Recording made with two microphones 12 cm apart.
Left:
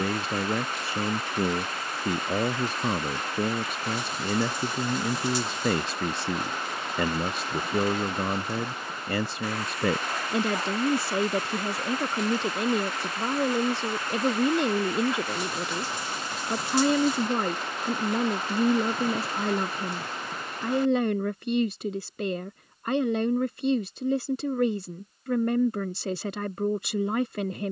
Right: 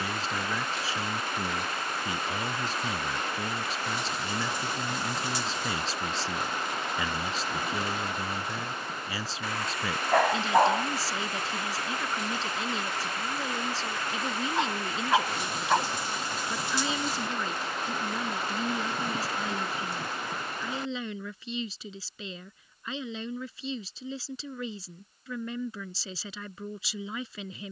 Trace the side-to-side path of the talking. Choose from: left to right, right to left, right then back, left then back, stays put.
stays put.